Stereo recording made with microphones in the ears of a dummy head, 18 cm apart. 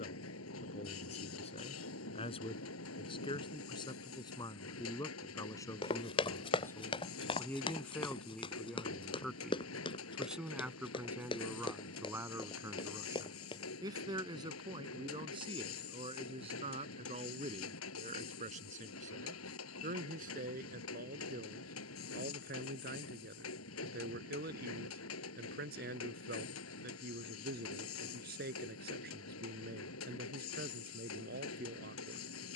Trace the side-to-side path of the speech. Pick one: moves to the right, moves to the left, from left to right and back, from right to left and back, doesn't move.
moves to the right.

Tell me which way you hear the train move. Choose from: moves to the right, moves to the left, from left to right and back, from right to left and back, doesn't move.
doesn't move.